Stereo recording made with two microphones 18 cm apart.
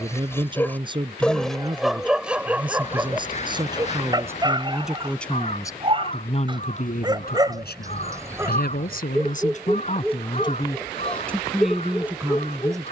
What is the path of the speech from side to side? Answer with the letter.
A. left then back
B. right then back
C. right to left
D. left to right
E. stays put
A.